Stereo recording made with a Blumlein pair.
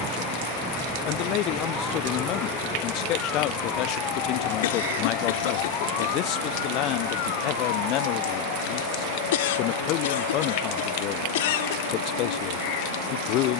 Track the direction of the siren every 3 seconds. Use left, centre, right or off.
centre, left, left, left, left.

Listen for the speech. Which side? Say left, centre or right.
left.